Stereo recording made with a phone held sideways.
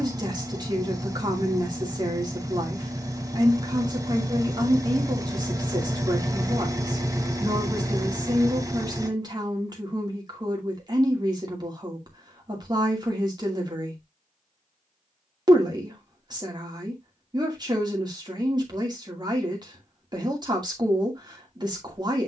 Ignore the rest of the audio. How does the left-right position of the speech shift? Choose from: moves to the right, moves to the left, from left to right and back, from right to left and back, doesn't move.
doesn't move.